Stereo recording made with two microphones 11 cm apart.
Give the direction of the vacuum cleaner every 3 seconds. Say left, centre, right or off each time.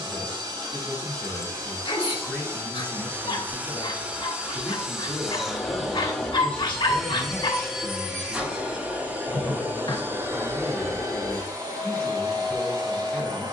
right, centre, centre, right, right.